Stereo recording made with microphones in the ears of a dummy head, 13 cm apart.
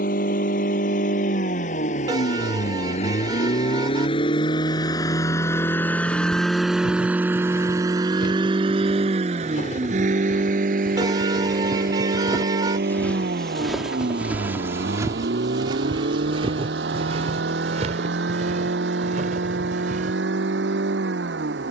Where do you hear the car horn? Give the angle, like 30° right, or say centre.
30° right.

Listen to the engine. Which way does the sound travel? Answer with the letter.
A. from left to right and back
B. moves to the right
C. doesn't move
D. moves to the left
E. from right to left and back
B.